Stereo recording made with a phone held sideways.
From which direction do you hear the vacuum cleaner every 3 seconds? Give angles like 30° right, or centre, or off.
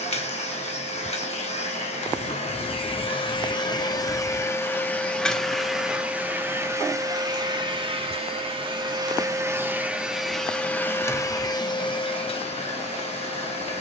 40° left, 20° left, 20° right, centre, 40° left.